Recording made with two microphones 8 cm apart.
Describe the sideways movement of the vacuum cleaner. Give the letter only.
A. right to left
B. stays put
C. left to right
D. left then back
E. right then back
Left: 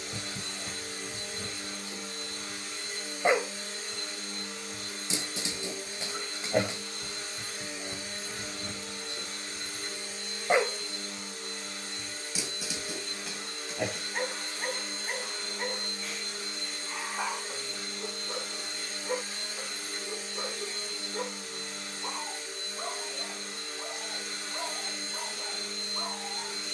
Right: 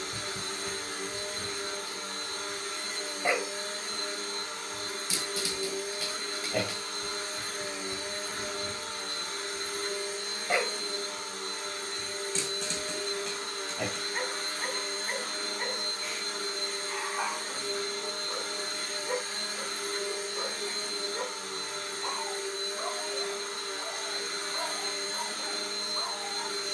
B.